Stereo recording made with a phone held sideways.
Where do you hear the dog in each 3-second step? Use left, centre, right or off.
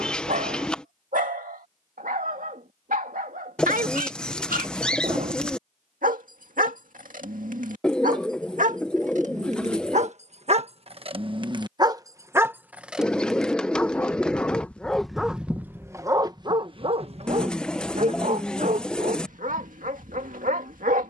right, right, right, right, centre, right, right.